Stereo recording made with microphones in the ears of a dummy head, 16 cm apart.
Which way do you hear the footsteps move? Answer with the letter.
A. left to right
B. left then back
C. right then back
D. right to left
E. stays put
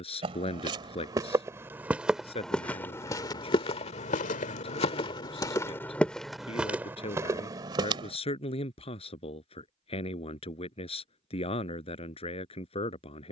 B.